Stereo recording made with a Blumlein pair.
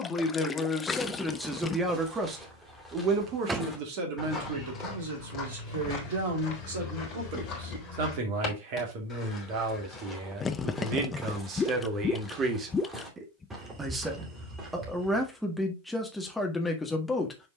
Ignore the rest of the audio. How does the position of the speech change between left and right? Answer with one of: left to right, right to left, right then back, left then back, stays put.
right then back.